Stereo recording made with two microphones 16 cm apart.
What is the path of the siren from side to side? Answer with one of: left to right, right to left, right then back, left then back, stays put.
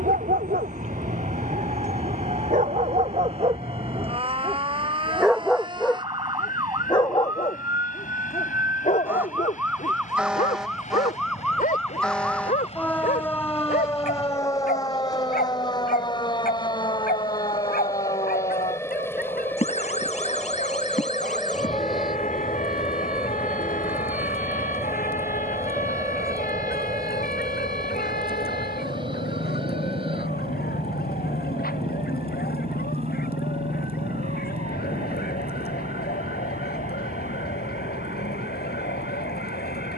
right to left.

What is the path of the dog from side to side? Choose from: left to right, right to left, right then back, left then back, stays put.
right to left.